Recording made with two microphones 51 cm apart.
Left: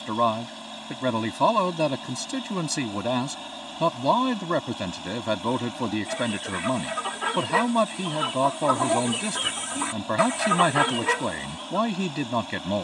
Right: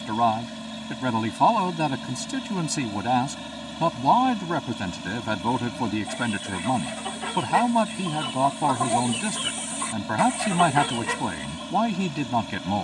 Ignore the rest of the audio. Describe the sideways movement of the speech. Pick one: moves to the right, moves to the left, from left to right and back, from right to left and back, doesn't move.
doesn't move.